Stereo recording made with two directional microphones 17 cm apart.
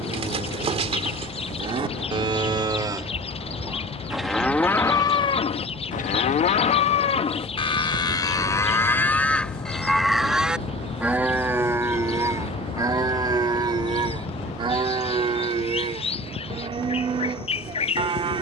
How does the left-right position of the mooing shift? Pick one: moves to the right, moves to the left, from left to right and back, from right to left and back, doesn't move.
from right to left and back.